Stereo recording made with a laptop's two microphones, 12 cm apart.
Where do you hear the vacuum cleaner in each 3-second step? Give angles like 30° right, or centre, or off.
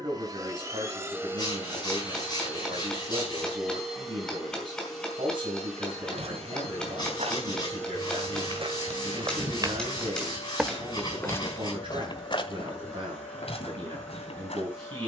20° right, centre, 10° left, 10° left, 10° left.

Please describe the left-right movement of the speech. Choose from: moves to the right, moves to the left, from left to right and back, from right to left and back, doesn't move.
doesn't move.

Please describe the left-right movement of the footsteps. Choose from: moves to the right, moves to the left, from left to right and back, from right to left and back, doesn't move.
moves to the left.